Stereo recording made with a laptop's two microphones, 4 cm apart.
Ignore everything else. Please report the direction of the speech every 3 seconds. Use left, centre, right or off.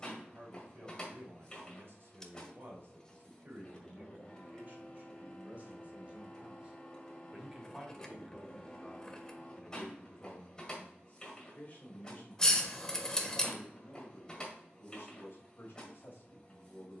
right, right, centre, left, left, left.